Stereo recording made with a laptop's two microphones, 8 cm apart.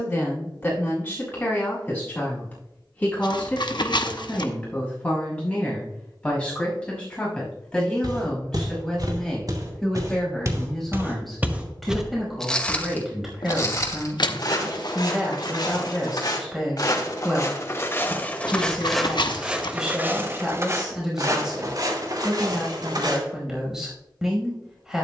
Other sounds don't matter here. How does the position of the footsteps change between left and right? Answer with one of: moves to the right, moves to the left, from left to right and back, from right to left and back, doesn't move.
from right to left and back.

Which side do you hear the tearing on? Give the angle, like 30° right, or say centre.
70° left.